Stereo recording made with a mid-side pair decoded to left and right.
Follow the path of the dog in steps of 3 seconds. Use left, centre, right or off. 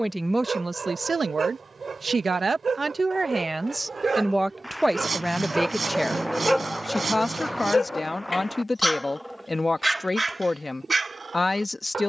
right, right, centre, right.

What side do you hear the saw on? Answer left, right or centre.
right.